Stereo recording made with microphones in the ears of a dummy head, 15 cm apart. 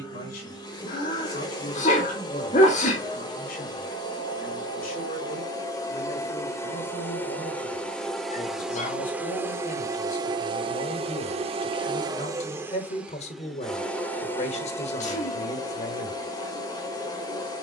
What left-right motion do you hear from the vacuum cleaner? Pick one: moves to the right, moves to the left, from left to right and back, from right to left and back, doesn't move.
from left to right and back.